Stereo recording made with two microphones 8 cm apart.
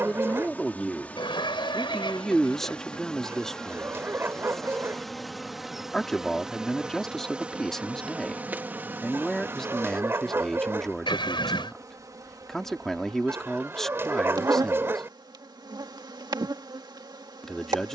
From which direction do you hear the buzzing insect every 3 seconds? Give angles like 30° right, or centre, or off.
20° left, 10° left, 10° right, 30° right, 50° right, 60° right.